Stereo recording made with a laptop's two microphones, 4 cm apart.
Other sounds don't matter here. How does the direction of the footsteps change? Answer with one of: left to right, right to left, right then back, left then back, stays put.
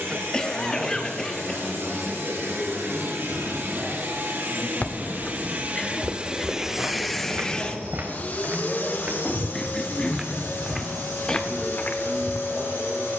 right then back.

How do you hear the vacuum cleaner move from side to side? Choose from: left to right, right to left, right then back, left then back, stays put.
right to left.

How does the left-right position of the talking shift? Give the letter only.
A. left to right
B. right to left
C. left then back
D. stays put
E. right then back
C.